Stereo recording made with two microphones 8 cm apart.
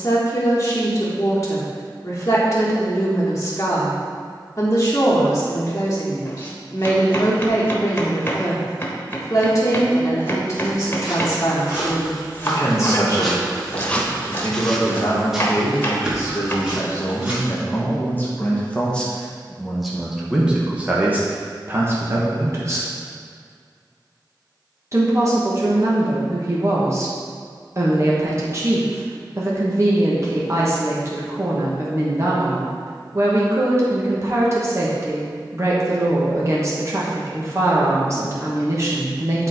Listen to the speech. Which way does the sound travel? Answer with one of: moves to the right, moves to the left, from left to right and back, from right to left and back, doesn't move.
moves to the right.